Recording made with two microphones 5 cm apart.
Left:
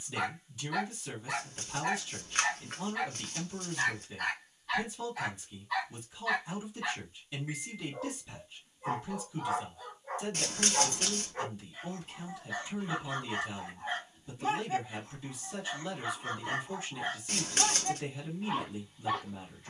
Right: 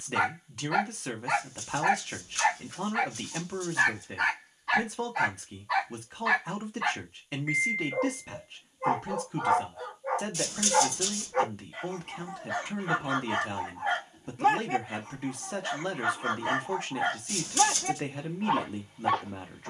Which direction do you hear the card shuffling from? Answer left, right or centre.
left.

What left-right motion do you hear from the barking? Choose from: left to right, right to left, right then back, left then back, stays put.
stays put.